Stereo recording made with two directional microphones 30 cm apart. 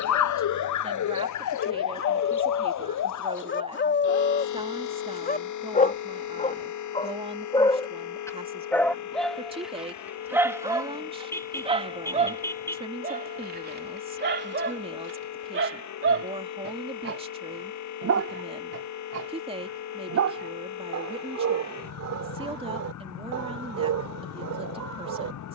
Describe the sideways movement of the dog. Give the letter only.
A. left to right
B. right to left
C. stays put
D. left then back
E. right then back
A.